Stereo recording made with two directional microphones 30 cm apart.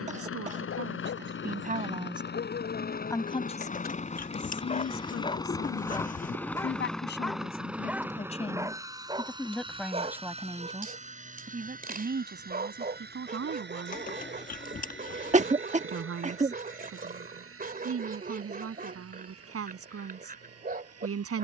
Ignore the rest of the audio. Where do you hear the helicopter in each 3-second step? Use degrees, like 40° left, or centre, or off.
40° left, 20° left, centre, 20° right, 30° right, 40° right, 50° right.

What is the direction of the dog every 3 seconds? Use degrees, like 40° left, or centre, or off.
40° left, 30° left, centre, 20° right, 30° right, 30° right, 30° right.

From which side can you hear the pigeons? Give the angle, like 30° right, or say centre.
30° left.